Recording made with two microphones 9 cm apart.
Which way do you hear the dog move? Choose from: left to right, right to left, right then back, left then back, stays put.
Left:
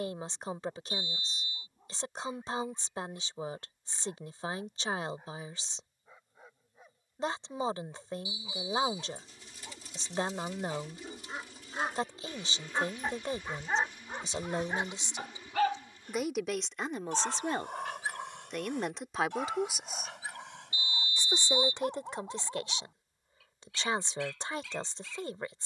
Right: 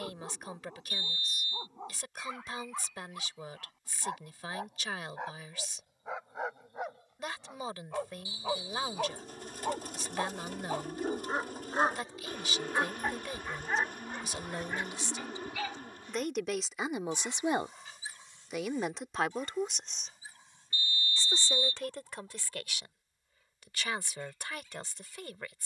right to left.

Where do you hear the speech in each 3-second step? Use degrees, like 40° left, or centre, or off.
30° left, 30° left, 30° left, 30° left, 30° left, centre, centre, 20° left, 30° left.